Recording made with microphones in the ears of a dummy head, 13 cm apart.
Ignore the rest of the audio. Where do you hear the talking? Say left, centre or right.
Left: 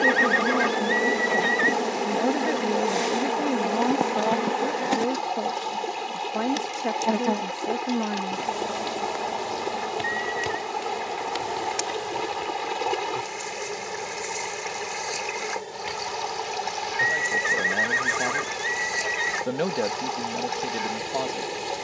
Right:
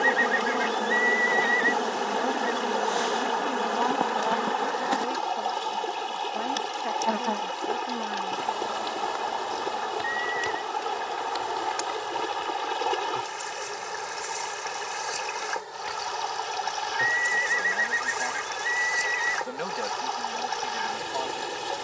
left.